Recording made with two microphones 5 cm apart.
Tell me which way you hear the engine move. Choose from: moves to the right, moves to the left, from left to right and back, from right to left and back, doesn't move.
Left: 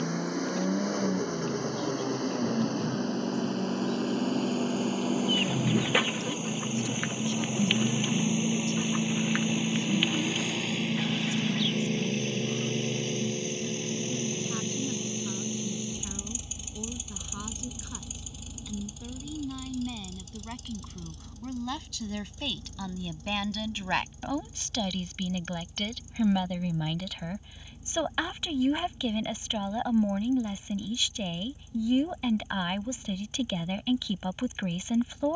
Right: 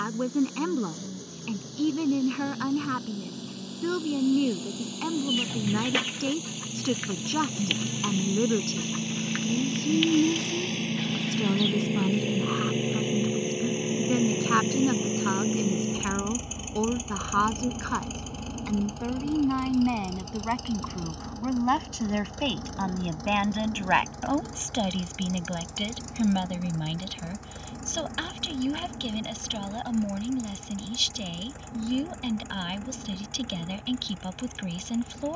moves to the right.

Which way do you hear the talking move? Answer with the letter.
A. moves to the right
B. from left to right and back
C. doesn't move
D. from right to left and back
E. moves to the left
E.